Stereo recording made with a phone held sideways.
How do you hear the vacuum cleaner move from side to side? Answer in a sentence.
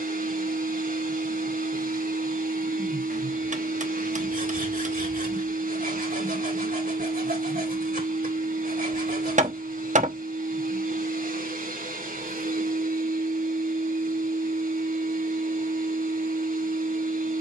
In this clip you hear the vacuum cleaner stay in one place.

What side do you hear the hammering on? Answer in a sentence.
You can hear the hammering on the right.